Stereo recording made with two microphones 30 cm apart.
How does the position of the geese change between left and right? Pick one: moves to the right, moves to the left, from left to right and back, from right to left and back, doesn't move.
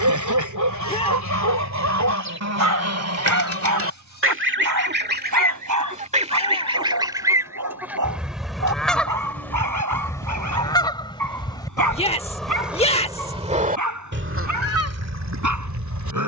from right to left and back.